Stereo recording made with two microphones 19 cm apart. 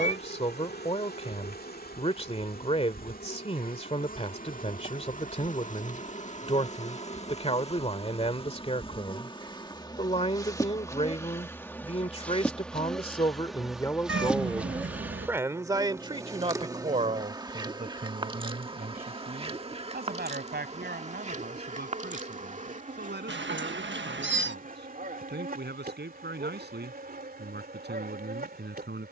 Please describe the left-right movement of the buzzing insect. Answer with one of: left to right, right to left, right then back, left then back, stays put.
left to right.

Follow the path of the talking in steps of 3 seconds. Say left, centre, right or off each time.
left, left, left, left, left, right, right, right, right, right.